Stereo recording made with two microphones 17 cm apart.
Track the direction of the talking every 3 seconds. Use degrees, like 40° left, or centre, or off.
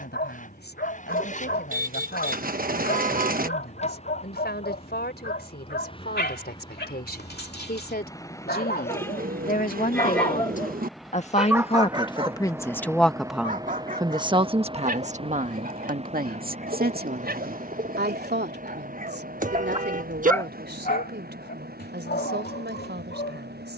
80° left, 70° left, 70° left, 50° left, 10° right, 60° right, 70° right, 80° right.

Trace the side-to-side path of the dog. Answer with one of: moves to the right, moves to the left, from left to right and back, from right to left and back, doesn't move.
from left to right and back.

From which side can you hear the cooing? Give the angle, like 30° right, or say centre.
60° right.